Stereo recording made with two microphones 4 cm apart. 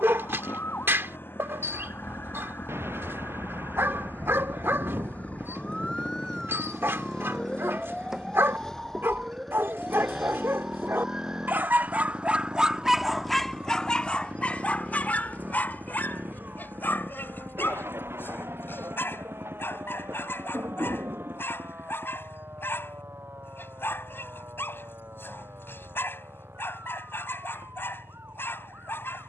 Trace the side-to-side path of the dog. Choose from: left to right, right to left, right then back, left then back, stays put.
right to left.